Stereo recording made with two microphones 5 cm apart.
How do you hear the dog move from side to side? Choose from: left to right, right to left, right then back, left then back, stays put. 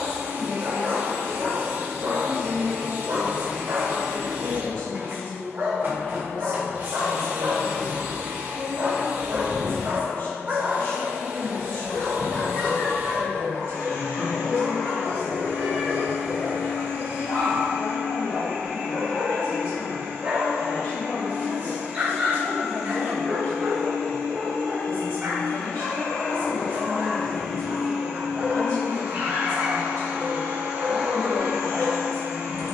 left then back.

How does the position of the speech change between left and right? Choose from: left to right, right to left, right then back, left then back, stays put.
stays put.